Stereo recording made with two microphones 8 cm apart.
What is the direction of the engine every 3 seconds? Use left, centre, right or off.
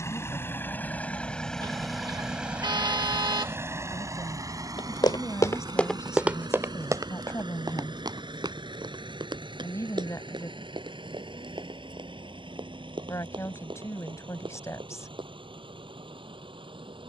centre, right, right, right, right, right.